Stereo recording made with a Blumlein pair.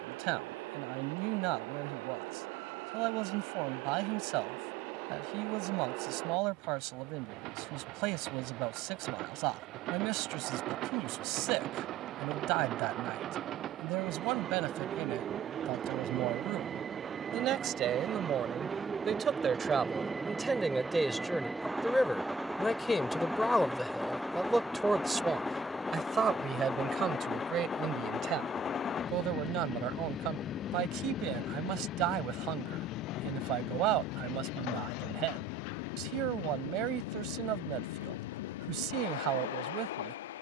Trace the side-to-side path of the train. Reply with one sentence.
You can hear the train move from right to left.